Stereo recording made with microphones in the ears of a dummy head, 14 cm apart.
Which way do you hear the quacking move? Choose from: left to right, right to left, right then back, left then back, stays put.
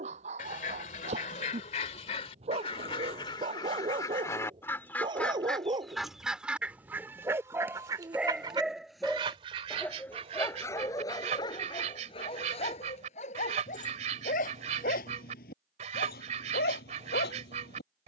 left to right.